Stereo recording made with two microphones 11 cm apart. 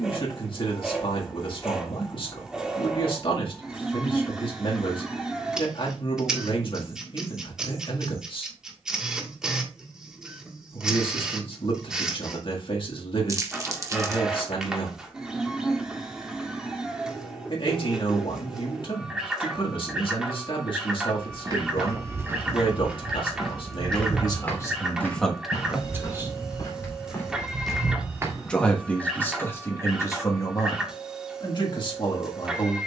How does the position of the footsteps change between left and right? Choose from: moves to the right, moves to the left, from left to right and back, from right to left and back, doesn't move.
from right to left and back.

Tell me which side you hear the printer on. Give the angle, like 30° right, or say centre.
10° right.